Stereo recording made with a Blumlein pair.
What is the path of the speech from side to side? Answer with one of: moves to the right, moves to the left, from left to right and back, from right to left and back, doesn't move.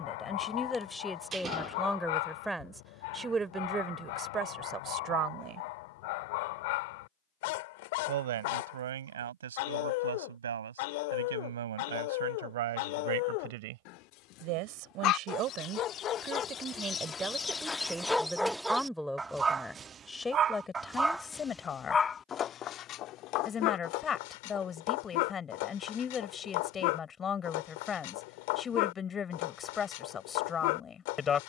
from left to right and back.